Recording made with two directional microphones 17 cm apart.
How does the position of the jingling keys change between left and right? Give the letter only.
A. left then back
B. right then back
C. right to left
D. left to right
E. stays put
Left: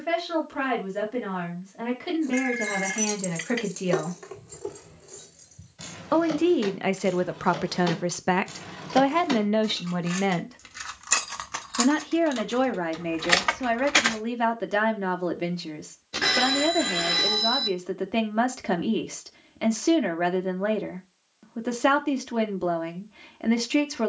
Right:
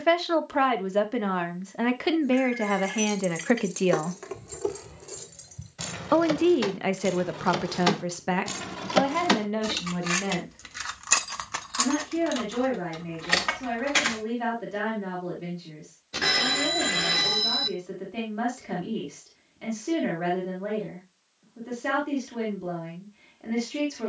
B.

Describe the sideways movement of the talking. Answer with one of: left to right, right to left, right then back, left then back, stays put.
right to left.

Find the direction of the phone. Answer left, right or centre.
centre.